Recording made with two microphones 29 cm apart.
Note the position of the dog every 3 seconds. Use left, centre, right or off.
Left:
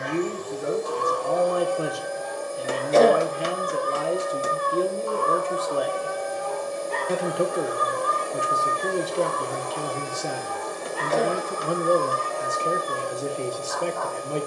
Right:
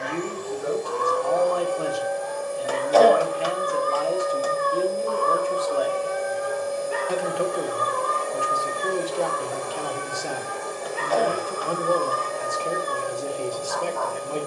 right, right, centre, right, right.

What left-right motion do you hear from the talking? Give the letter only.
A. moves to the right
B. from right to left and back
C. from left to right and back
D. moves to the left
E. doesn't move
E.